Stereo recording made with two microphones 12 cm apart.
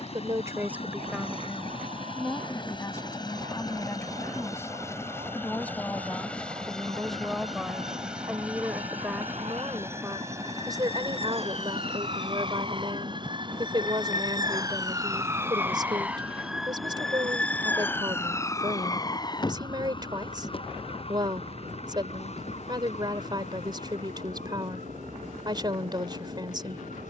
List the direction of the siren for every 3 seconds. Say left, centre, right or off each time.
right, right, right, right, right, centre, left, left, left.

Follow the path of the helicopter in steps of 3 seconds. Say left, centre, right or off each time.
left, left, centre, right, right, right, right, right, right.